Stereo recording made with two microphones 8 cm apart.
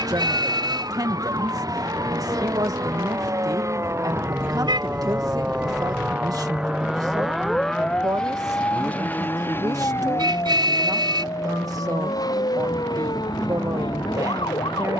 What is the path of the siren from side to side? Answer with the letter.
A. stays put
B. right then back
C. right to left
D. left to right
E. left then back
C.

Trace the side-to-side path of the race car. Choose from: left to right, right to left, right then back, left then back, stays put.
right to left.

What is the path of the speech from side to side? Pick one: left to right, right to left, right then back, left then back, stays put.
stays put.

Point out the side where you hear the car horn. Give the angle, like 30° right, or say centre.
70° right.